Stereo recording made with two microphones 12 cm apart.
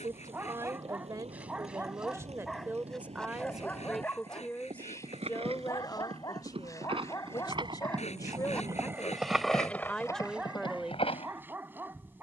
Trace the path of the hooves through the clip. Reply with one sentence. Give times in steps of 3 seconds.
In this clip you hear the hooves on the right from 0 s and on the left from 9 s.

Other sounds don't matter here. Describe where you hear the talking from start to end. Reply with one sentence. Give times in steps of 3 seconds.
In this clip you hear the talking on the right from 0 s, in the centre from 3 s, on the left from 6 s and in the centre from 9 s.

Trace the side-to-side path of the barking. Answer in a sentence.
You can hear the barking move from right to left and back again.